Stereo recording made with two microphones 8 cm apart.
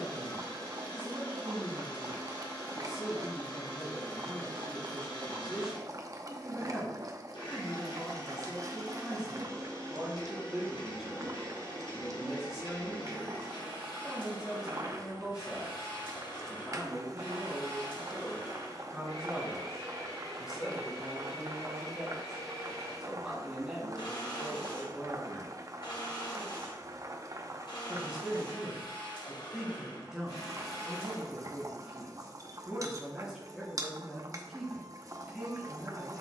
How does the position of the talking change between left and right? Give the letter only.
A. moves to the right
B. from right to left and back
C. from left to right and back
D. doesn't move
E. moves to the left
D.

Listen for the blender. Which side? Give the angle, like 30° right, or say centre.
80° left.